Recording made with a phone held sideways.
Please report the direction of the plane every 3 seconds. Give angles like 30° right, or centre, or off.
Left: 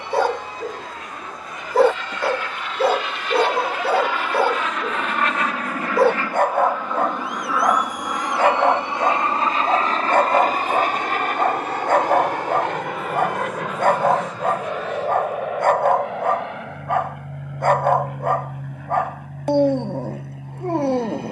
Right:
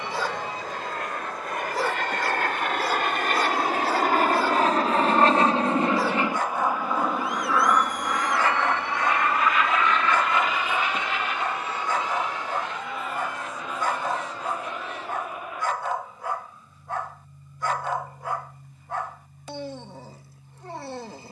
60° right, 40° right, centre, 40° left, 50° left, 60° left, 70° left.